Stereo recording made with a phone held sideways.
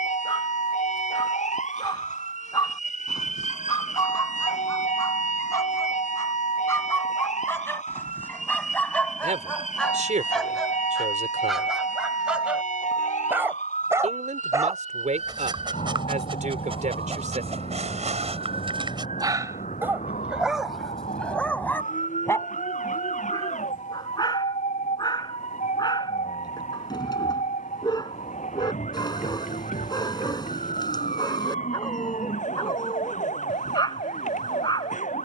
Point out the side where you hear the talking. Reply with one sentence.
In this clip you hear the talking on the right.